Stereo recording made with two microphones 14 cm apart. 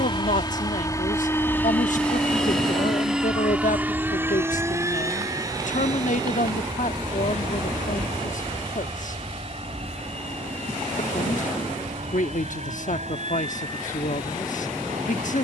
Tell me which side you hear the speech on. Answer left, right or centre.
left.